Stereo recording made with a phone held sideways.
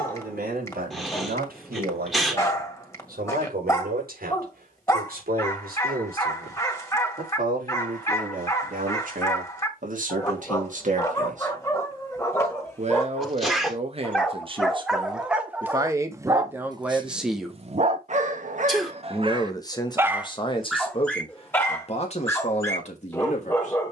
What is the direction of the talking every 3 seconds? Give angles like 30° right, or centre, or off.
80° right, 70° right, 70° right, 60° right, 40° right, 10° right, 30° left, 50° left.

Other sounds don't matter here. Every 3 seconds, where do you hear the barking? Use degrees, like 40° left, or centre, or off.
20° left, 20° left, 20° left, 20° left, 10° left, 20° right, 40° right, 20° left.